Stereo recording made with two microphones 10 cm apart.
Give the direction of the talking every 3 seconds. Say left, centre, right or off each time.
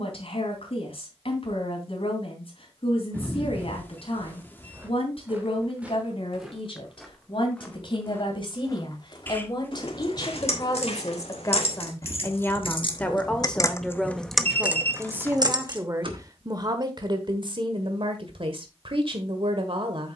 left, left, left, left, centre, right, right.